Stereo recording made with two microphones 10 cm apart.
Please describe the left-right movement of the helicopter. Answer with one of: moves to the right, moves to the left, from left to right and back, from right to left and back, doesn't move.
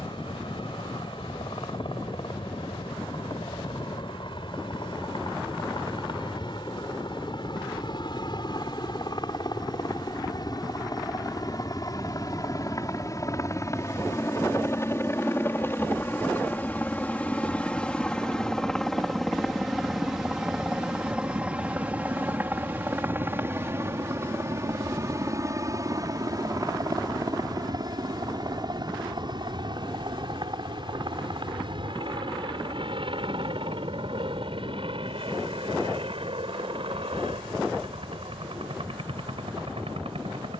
moves to the right.